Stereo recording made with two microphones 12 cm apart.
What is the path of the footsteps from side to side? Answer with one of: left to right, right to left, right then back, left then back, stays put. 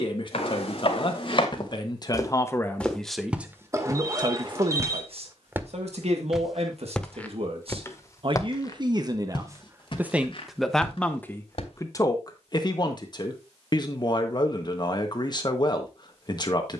right then back.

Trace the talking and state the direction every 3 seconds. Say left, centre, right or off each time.
left, right, right, centre, left, left.